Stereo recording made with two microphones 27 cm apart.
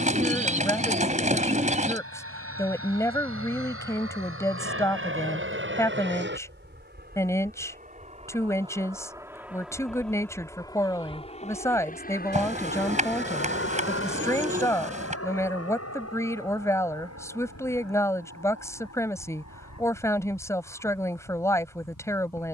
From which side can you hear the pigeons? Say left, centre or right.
right.